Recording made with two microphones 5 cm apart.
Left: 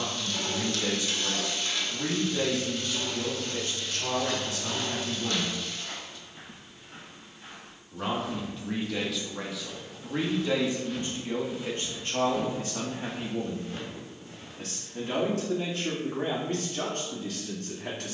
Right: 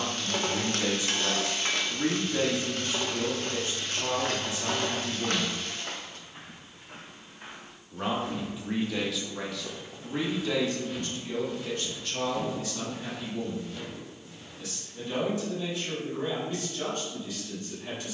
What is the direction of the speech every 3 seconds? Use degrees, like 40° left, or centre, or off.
30° right, 30° right, 10° right, 20° left, 50° left, 70° left.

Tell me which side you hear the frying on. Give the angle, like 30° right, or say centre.
50° right.